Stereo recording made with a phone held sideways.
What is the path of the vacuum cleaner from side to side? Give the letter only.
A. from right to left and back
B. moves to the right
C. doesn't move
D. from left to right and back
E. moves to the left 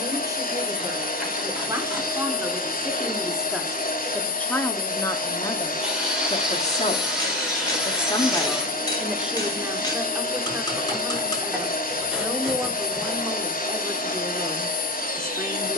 C.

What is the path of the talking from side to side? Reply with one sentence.
You can hear the talking move from right to left and back again.